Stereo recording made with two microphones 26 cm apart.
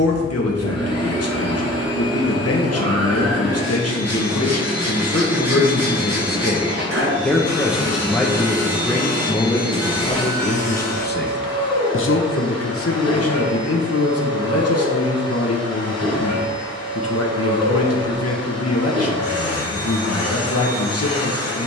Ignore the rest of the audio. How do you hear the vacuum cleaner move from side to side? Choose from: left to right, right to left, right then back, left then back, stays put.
stays put.